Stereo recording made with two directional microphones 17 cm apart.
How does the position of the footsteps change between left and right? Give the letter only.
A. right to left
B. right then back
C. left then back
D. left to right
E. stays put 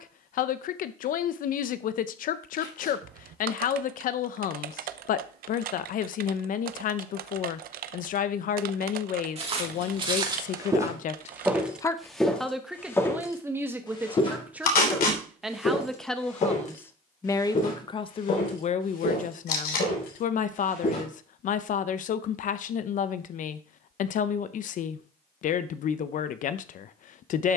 A.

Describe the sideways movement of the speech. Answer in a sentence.
In this clip you hear the speech go right and come back.